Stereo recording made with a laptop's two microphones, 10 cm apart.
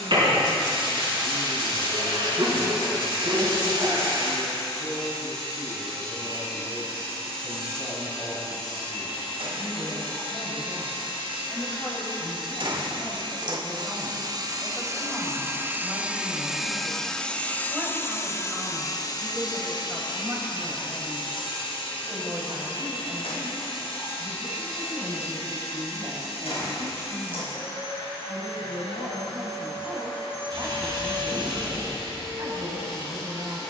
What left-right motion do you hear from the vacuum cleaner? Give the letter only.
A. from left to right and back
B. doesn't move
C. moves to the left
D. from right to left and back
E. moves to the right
C.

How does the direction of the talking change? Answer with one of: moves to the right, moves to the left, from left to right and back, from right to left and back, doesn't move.
moves to the right.